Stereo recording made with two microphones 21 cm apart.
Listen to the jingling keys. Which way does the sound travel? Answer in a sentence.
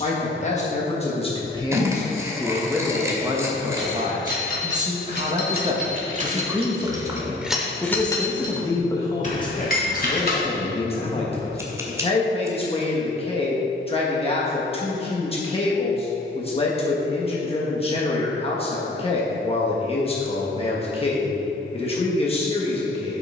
In this clip you hear the jingling keys travel towards the left.